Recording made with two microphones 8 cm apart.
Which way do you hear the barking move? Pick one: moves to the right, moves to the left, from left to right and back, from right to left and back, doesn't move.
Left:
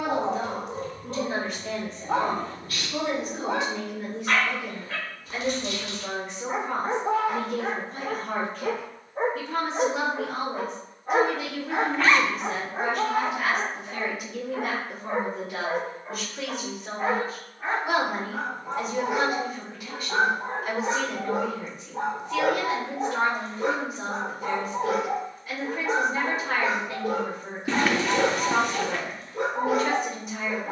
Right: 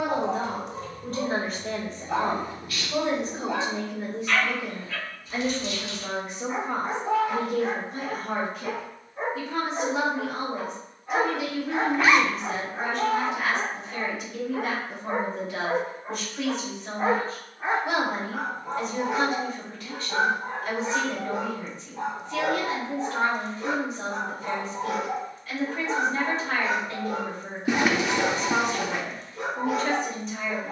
from left to right and back.